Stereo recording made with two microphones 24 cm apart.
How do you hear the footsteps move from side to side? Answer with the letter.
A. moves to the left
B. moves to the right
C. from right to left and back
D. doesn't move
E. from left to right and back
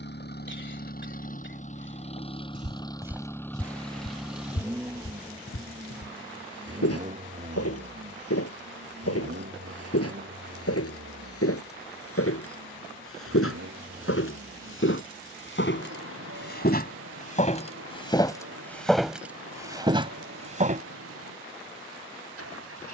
C.